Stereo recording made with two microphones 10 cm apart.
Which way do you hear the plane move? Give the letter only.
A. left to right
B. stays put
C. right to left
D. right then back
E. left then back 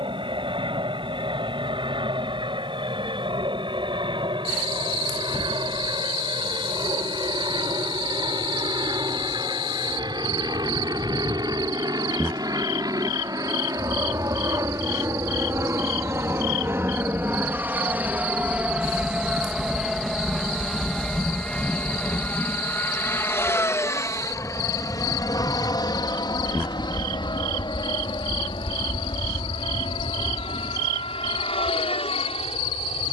C.